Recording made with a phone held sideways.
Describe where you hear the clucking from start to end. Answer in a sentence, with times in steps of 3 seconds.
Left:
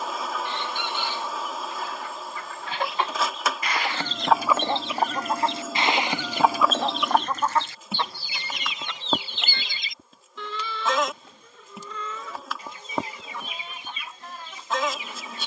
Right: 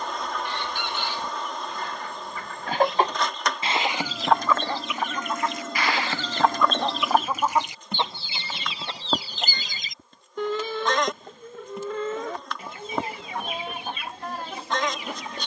In this clip you hear the clucking on the right from 0 s, in the centre from 3 s and on the right from 9 s.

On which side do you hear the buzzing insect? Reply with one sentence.
In this clip you hear the buzzing insect in the centre.